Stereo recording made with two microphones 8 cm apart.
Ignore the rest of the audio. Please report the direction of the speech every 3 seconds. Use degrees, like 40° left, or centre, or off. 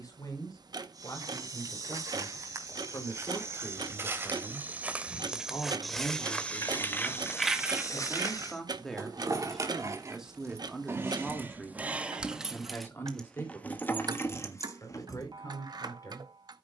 50° left, 30° left, 20° left, centre, 30° left, 50° left.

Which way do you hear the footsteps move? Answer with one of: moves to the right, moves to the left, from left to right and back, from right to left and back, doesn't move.
moves to the left.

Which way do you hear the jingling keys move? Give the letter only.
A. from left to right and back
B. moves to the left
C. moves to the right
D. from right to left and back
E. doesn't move
A.